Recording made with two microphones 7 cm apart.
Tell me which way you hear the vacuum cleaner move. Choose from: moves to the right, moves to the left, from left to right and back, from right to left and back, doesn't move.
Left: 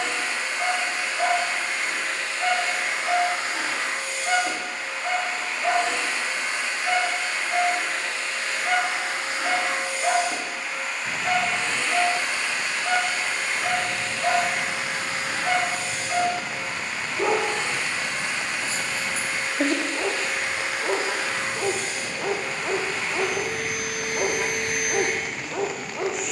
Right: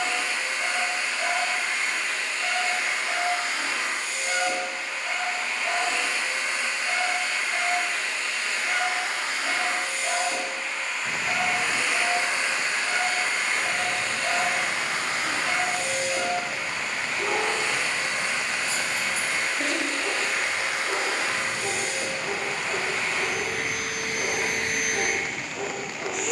moves to the right.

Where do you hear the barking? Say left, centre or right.
left.